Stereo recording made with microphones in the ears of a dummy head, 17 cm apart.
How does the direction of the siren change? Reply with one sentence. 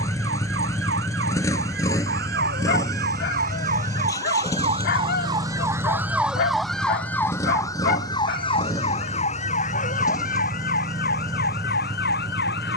You can hear the siren go from the right side to the left.